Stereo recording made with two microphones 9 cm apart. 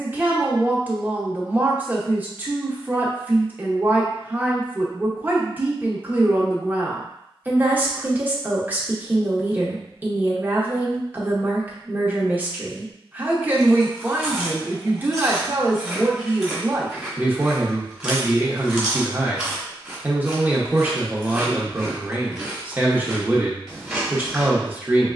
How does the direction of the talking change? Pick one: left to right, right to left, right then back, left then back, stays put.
stays put.